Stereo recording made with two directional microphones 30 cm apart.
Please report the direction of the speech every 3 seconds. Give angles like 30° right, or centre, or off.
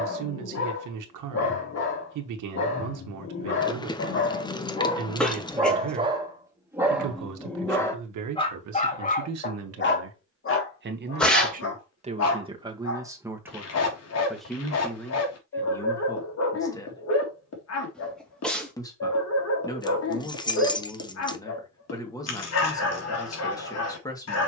70° right, 70° right, 70° right, 40° right, 10° right, 10° left, 10° left, 10° left.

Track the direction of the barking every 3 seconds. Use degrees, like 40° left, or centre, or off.
50° left, 30° left, centre, 40° left, 50° left, 50° left, 50° left, 50° left.